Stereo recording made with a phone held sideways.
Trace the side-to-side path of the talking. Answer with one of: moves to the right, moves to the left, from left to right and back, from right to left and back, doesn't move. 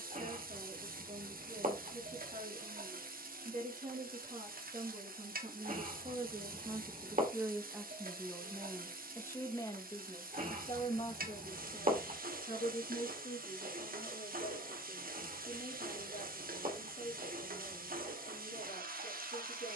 moves to the left.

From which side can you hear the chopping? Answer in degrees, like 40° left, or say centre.
60° right.